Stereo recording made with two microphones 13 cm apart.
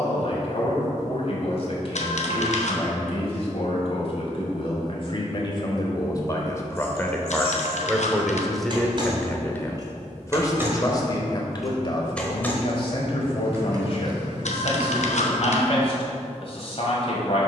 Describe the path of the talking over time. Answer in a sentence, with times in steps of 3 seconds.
In this clip you hear the talking on the left from 0 s, in the centre from 6 s and on the left from 9 s.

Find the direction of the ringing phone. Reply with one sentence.
You can hear the ringing phone on the left.